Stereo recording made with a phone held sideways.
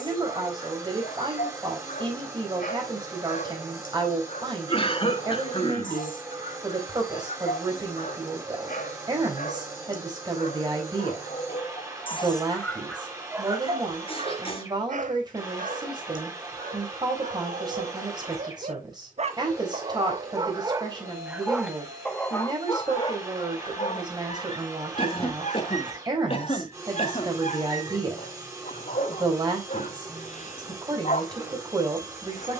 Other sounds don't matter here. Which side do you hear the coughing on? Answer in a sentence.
You can hear the coughing on the left.